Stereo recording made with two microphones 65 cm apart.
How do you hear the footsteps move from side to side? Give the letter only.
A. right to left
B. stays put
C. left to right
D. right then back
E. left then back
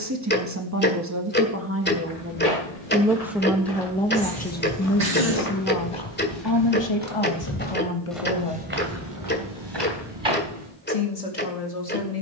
C.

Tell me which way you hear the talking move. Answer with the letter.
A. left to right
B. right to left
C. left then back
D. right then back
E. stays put
B.